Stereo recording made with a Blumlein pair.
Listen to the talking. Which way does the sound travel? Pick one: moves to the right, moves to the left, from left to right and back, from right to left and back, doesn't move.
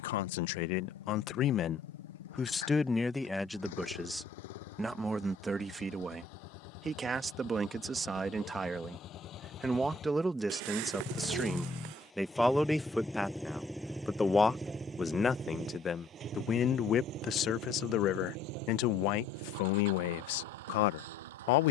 from left to right and back.